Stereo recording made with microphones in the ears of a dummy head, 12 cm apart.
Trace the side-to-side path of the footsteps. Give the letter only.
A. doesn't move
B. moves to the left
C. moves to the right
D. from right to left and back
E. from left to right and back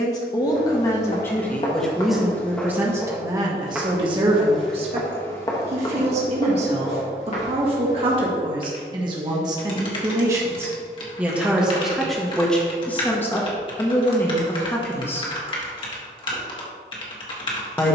E.